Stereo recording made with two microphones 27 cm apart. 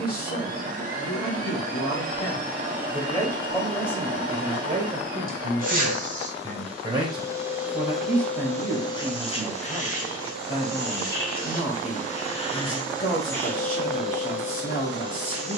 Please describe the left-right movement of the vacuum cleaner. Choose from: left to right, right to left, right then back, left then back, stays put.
left then back.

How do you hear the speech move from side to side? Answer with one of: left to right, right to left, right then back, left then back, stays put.
right then back.